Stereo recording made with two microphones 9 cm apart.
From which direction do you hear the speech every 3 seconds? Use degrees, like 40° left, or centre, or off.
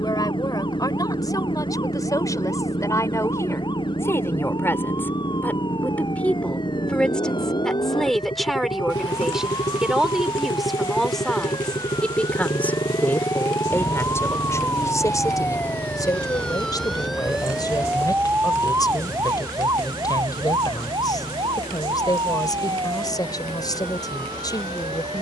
40° left, 30° left, 10° left, centre, 30° left, 50° left, 50° left, 50° left, 50° left.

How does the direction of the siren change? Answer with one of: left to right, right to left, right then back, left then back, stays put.
left to right.